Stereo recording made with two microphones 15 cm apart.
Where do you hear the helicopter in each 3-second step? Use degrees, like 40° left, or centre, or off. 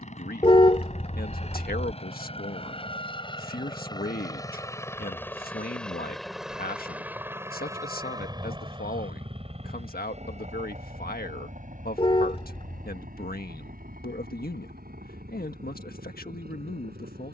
50° left, 20° left, 20° right, 50° right, 60° right, 70° right.